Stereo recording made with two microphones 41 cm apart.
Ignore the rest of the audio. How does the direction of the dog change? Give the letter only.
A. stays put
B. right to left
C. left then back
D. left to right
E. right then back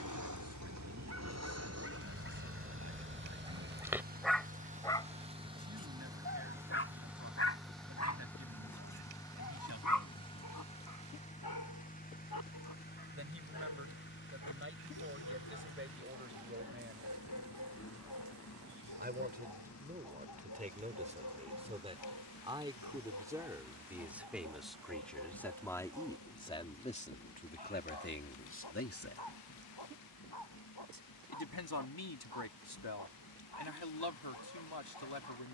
B.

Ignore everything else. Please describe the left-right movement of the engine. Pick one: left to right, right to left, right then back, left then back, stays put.
right to left.